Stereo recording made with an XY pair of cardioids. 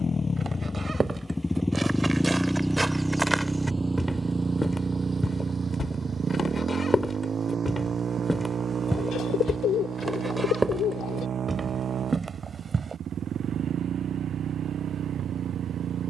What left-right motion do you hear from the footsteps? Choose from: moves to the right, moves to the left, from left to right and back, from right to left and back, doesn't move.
from right to left and back.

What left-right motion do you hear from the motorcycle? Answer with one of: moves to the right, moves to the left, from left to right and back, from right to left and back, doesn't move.
moves to the right.